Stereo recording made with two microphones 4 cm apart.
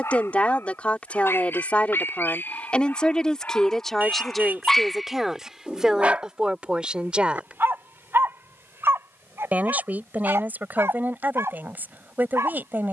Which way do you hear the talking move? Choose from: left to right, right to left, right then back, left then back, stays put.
left to right.